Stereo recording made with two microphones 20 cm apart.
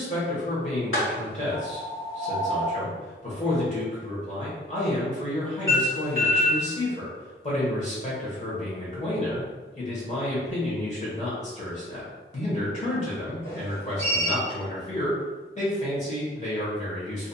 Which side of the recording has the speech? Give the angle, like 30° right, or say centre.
30° left.